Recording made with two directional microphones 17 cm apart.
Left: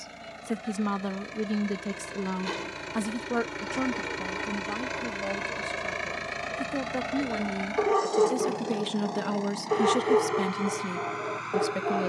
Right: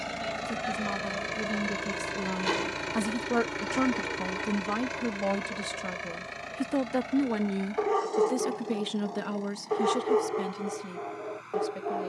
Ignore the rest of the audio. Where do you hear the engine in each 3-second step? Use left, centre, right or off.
right, centre, left, left.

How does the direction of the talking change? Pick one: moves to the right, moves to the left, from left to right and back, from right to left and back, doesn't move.
from left to right and back.